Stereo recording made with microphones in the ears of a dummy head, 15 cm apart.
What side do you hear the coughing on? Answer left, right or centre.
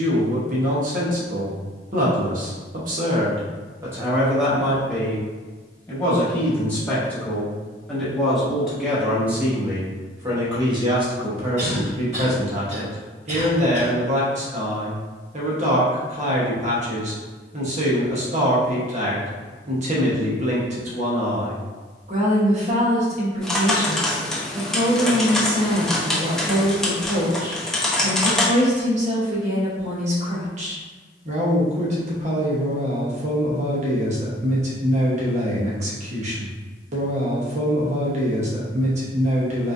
right.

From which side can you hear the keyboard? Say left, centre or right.
centre.